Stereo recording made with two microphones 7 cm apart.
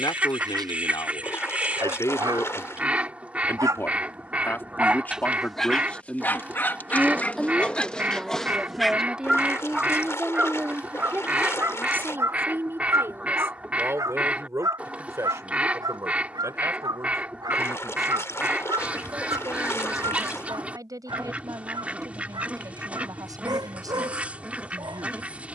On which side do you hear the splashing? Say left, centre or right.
left.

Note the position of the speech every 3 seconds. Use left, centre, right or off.
left, left, centre, right, right, right, right, right, right.